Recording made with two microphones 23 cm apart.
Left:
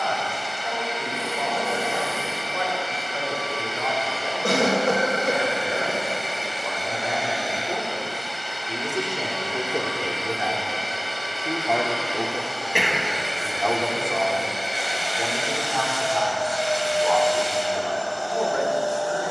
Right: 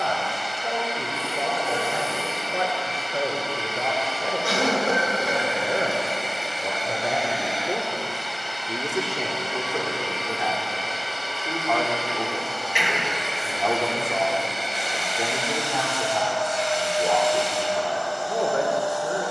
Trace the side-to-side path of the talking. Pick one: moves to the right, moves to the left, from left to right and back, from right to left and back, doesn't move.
from right to left and back.